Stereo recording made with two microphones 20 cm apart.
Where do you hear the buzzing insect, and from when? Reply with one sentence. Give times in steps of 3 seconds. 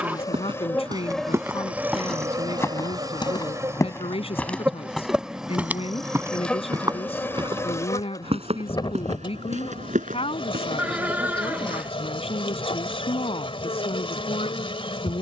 In this clip you hear the buzzing insect in the centre from 0 s and on the left from 9 s.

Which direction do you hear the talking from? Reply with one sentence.
You can hear the talking on the left.